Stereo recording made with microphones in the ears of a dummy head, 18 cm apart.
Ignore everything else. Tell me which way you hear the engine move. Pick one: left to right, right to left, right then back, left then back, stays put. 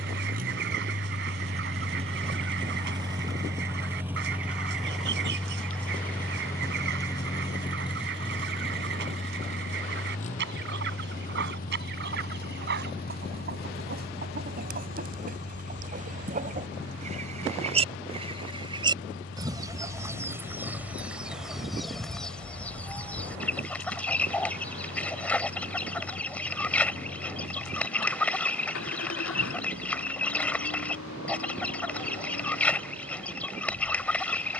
right to left.